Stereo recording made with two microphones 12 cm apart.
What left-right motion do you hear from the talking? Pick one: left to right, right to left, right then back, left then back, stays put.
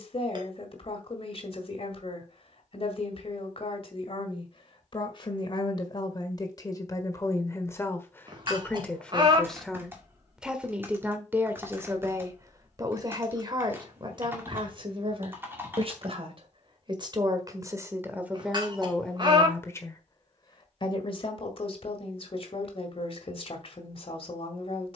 right then back.